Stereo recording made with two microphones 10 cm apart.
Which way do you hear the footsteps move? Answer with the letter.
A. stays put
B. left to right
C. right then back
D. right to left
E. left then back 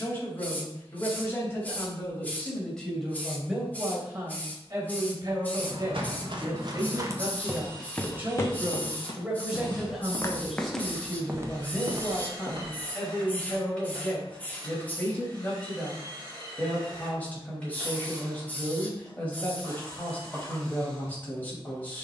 E.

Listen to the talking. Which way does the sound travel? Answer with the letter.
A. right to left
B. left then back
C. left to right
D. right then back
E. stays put
D.